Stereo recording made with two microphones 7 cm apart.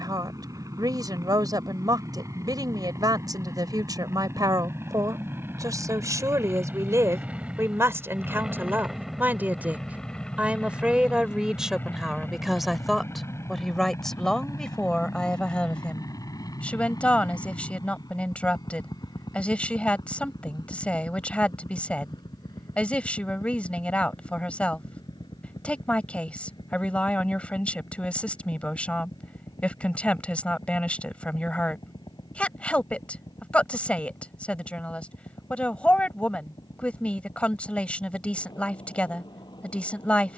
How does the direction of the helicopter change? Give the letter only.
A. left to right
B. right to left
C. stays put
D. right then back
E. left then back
B.